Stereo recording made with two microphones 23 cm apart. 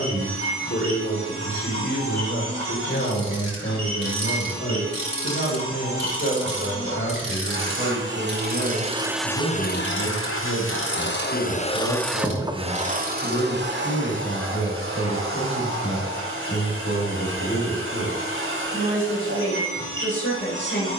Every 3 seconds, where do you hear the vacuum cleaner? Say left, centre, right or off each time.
right, right, right, left, right, right, right.